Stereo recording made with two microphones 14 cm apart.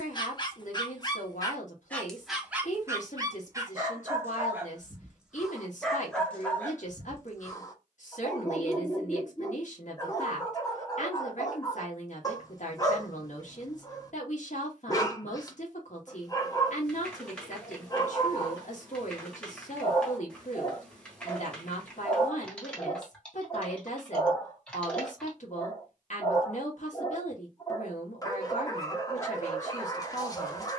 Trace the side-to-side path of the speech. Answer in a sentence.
You can hear the speech stay put.